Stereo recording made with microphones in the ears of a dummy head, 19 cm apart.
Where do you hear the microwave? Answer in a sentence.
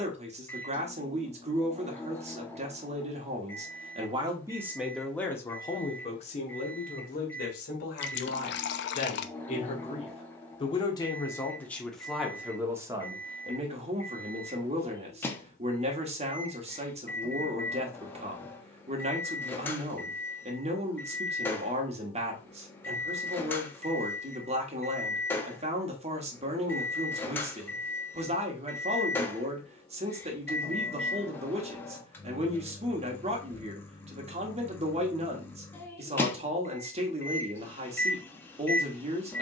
In this clip you hear the microwave in the centre.